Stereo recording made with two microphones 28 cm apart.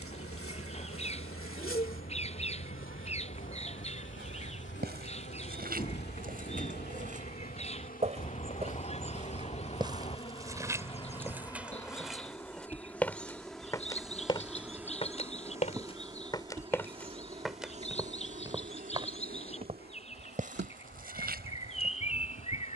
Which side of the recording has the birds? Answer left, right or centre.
left.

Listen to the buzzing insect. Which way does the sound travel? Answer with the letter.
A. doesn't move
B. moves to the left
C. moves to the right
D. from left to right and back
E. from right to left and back
C.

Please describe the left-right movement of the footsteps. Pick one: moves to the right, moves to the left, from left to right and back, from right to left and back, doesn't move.
from right to left and back.